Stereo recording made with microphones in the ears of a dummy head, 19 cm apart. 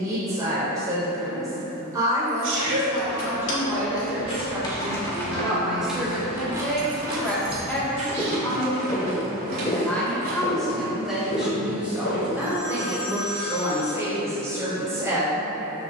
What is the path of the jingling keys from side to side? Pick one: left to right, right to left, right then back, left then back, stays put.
left to right.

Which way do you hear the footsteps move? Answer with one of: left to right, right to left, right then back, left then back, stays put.
right to left.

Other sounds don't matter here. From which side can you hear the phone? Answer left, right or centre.
centre.